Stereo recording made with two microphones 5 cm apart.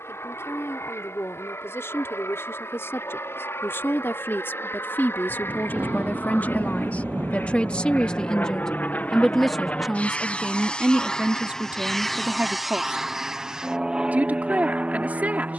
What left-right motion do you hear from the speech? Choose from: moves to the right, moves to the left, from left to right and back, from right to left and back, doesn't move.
moves to the right.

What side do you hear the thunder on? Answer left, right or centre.
right.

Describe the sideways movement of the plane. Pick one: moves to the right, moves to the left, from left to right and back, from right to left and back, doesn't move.
moves to the right.